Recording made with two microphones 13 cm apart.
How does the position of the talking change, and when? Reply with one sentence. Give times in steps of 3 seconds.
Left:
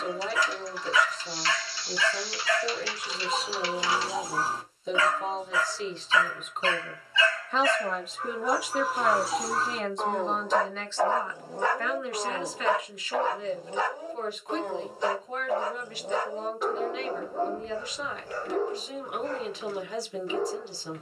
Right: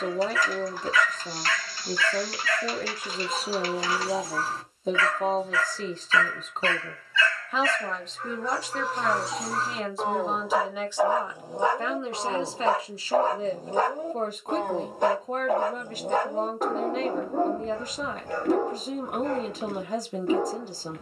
In this clip you hear the talking on the right from 0 s, in the centre from 6 s and on the right from 12 s.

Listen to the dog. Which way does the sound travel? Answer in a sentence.
In this clip you hear the dog go from the left side to the right.